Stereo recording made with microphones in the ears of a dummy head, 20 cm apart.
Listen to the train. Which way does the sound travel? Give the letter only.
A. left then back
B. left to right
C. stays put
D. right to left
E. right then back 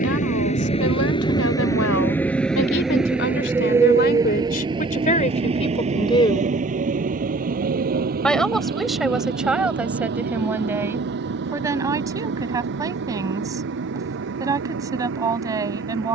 B.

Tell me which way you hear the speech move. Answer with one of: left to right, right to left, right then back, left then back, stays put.
left to right.